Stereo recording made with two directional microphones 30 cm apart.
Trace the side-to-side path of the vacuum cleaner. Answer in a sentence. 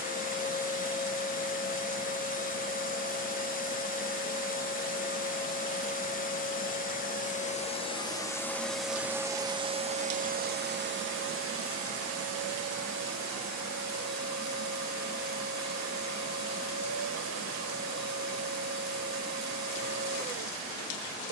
In this clip you hear the vacuum cleaner go from the left side to the right.